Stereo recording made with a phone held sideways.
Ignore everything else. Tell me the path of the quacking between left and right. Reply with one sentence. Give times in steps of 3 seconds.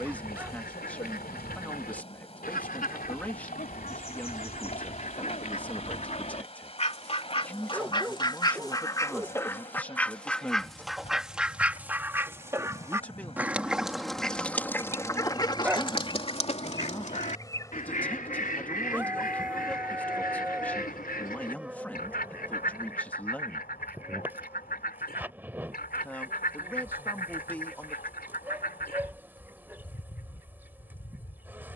You can hear the quacking on the left from 0 s, in the centre from 9 s and on the left from 15 s.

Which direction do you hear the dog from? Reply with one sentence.
In this clip you hear the dog in the centre.